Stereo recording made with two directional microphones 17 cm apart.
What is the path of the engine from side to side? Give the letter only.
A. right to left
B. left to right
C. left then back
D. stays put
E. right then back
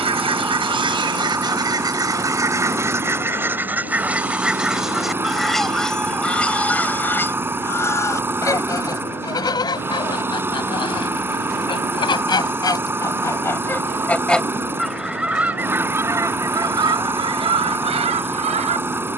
D.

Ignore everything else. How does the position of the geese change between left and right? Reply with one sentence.
In this clip you hear the geese go left and come back.